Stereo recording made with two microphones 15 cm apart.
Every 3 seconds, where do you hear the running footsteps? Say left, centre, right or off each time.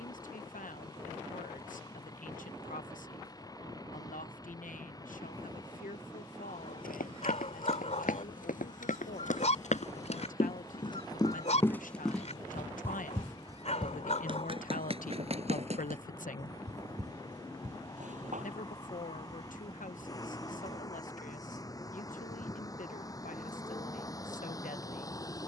off, off, left, left, right, right, right, off, off.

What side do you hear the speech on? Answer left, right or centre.
left.